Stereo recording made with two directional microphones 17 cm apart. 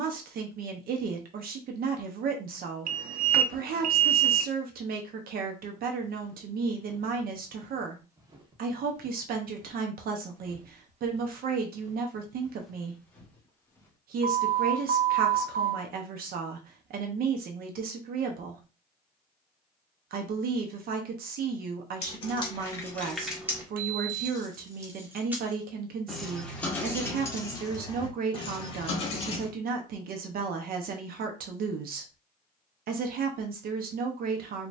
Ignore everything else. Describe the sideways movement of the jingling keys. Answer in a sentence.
You can hear the jingling keys go right and come back.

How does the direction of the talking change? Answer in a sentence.
In this clip you hear the talking stay put.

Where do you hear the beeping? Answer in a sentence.
In this clip you hear the beeping on the right.